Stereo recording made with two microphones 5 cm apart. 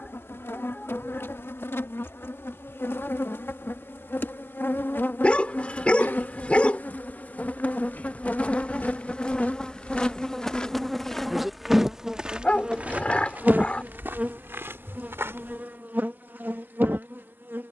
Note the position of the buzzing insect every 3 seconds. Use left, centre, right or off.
left, left, left, centre, right, right.